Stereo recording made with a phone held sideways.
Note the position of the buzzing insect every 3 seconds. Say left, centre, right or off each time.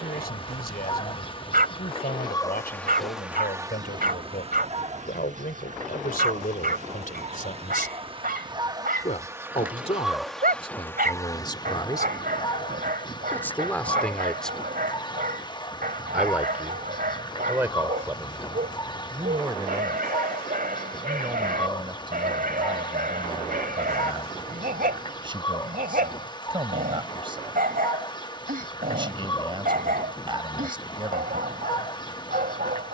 left, right, right, centre, left, left, left, left, left, left, left.